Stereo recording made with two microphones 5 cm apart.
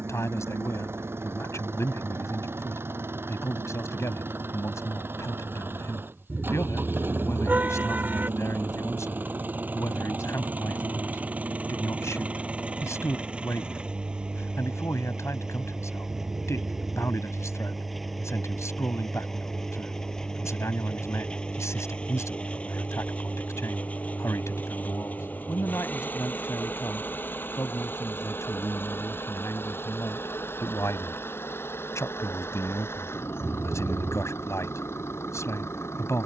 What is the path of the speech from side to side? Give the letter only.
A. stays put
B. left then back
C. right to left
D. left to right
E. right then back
A.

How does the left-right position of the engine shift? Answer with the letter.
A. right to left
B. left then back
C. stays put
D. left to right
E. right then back
A.